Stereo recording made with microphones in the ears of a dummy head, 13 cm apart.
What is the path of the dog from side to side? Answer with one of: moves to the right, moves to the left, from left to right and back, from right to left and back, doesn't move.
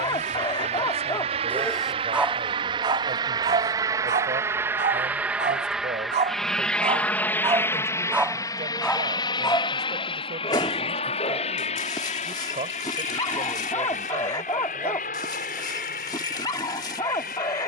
from left to right and back.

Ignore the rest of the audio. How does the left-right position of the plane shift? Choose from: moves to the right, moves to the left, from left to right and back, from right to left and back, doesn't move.
moves to the left.